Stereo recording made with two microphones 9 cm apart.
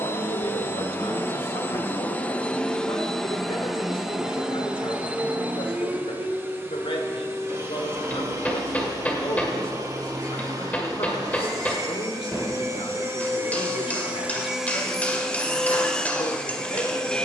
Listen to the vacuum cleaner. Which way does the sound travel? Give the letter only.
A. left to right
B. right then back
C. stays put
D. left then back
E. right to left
B.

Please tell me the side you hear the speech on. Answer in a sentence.
In this clip you hear the speech on the left.